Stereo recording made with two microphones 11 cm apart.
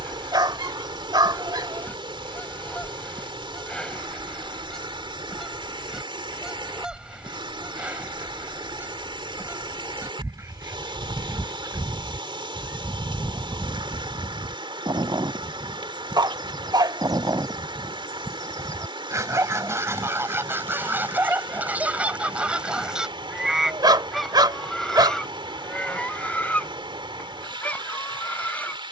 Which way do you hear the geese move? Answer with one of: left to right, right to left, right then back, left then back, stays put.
right then back.